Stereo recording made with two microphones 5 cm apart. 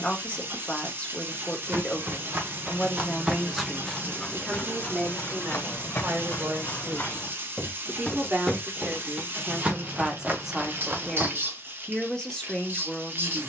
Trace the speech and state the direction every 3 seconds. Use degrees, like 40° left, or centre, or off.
20° left, 20° right, 40° right, 10° right, 10° left.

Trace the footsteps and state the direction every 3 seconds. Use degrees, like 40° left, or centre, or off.
50° right, 20° left, 30° left, 40° right, off.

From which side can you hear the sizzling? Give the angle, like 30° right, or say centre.
40° right.